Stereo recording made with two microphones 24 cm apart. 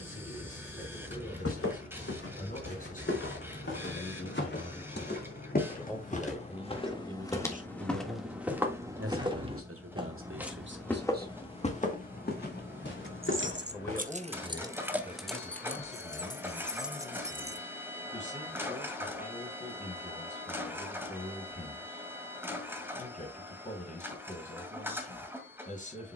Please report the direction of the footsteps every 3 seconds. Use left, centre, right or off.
left, left, centre, centre, left, off, off, off, off.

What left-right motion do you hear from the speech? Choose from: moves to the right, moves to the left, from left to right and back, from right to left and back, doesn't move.
from left to right and back.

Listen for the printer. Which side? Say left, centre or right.
centre.